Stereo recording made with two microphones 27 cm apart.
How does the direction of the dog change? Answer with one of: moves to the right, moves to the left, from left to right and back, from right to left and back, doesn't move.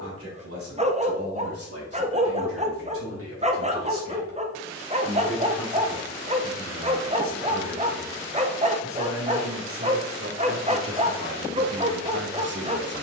doesn't move.